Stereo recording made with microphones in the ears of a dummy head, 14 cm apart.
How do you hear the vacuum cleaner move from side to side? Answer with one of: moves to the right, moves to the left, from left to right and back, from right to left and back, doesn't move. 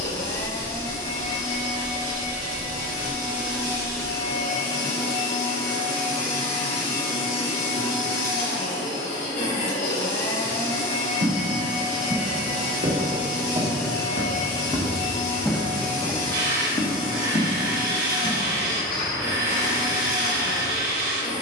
doesn't move.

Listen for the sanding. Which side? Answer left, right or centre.
right.